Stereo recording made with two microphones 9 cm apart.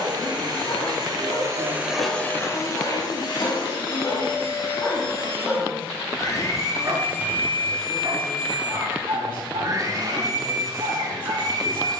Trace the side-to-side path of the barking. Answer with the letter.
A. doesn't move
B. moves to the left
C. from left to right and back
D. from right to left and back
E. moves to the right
E.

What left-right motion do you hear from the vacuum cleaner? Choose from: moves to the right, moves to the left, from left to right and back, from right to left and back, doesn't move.
from right to left and back.